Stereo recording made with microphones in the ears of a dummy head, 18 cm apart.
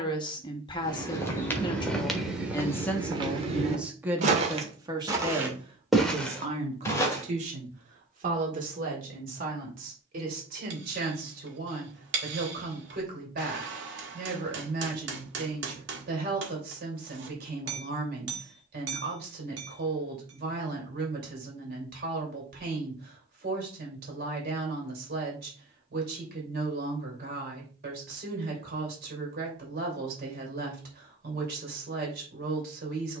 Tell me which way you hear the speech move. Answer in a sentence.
In this clip you hear the speech move to the right.